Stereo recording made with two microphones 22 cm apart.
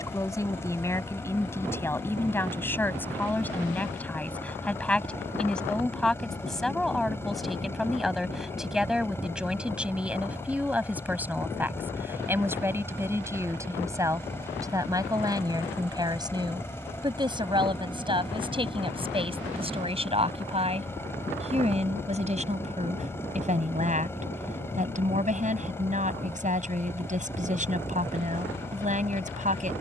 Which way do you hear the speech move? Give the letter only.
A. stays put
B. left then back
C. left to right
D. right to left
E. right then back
C.